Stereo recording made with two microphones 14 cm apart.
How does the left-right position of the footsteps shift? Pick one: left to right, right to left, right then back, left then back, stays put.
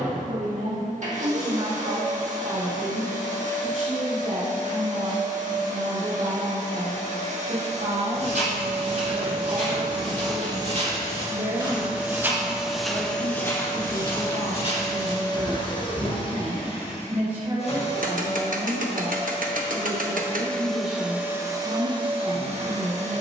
right to left.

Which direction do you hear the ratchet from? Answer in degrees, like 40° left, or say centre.
70° right.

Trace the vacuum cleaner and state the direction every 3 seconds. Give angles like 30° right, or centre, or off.
60° right, 60° right, 50° right, 30° right, 10° left, 40° left, 30° left, 30° right.